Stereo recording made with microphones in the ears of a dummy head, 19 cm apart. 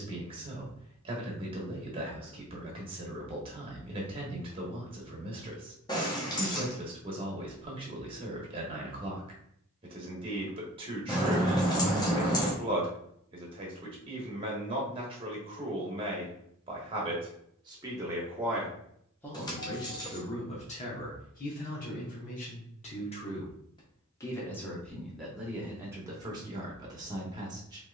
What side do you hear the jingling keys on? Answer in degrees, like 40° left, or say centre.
20° left.